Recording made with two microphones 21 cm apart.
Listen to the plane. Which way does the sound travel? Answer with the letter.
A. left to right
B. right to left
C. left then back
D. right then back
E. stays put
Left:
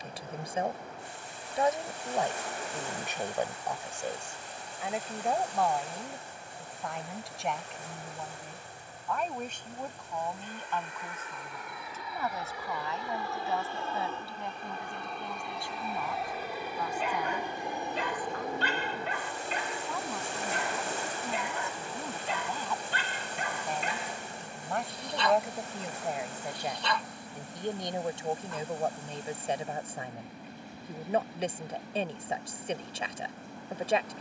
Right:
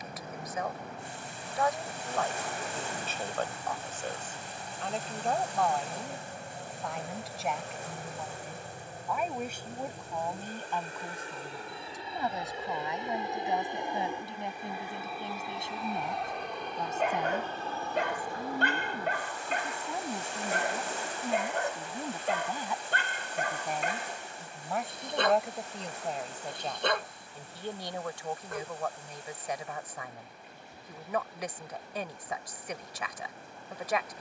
B.